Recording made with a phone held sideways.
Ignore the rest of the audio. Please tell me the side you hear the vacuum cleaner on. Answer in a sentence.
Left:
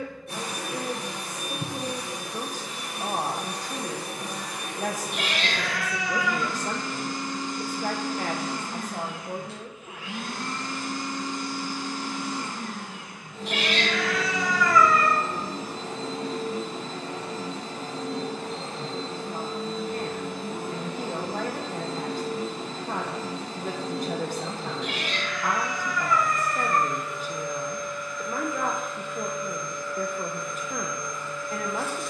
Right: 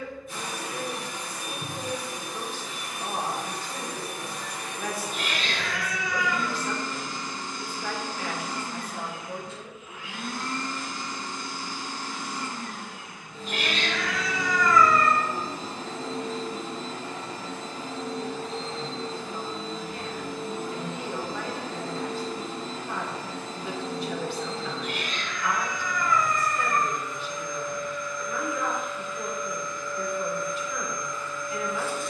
You can hear the vacuum cleaner on the left.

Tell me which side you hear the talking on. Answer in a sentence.
You can hear the talking on the left.